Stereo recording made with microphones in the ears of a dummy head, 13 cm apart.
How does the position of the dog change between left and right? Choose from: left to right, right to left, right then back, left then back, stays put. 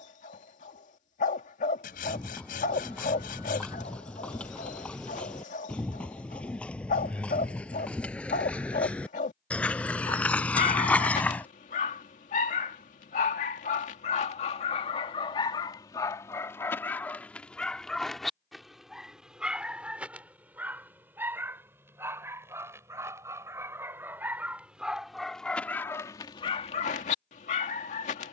right then back.